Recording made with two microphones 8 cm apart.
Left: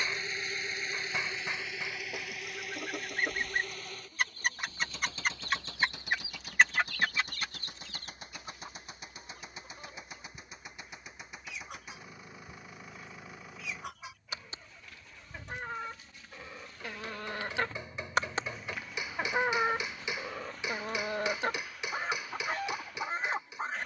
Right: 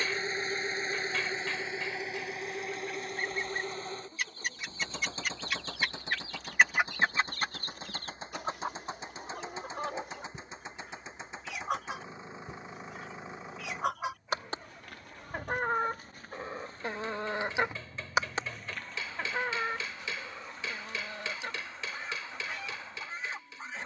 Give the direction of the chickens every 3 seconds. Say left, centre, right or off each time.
left, left, right, right, right, right, left, left.